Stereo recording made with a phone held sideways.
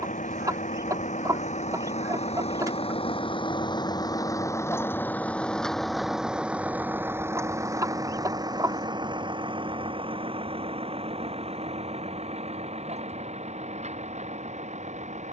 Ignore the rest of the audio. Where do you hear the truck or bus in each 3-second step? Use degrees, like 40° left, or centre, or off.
60° left, 20° left, 20° right, 40° right, 50° right.